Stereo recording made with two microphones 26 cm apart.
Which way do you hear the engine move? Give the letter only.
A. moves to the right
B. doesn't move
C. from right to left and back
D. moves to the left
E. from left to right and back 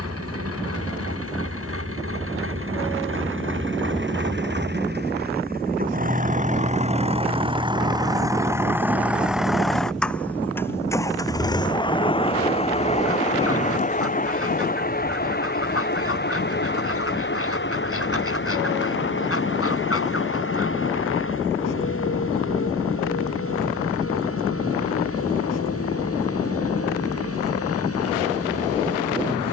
D.